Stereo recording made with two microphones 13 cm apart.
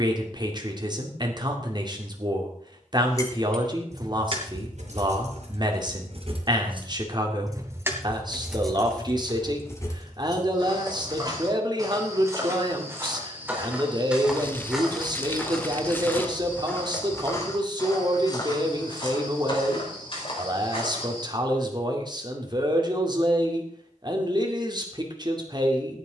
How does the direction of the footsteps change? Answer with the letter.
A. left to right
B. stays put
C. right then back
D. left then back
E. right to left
E.